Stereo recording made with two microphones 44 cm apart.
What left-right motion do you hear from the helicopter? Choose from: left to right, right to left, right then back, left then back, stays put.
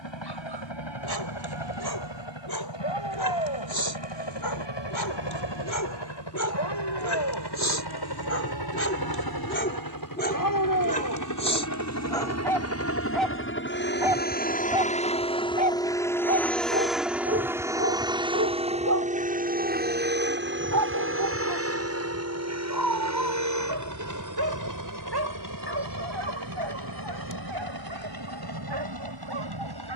left to right.